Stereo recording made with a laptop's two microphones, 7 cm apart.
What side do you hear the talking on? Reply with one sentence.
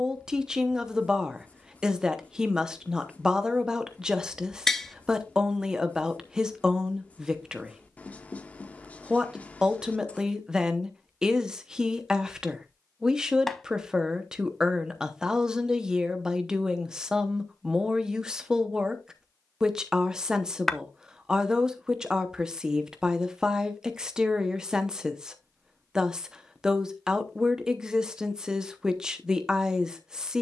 In this clip you hear the talking in the centre.